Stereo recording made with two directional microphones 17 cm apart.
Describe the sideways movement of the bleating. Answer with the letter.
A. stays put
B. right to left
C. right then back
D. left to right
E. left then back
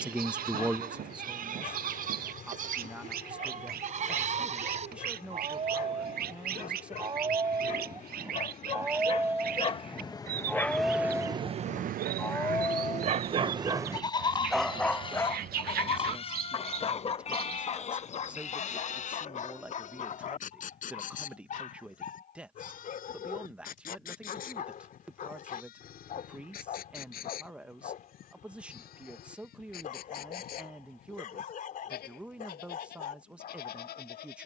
B.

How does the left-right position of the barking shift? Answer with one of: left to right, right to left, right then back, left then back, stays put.
right then back.